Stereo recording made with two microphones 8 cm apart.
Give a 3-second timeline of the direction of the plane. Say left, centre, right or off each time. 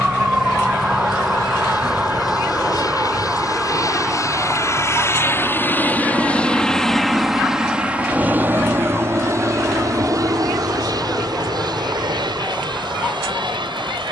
left, left, centre, right, right.